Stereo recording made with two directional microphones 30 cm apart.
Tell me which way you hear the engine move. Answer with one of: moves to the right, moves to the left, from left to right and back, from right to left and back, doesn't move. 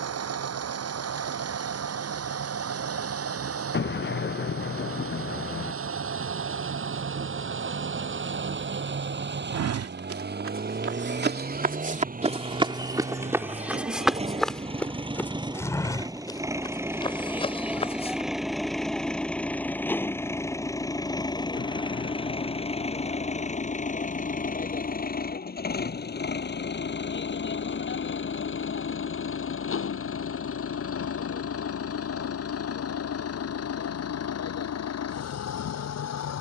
moves to the left.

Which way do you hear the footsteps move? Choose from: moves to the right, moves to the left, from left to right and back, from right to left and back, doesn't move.
moves to the left.